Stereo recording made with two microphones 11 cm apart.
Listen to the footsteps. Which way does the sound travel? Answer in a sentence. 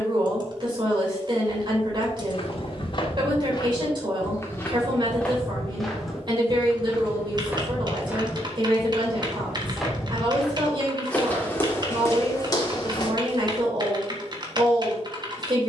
You can hear the footsteps go right and come back.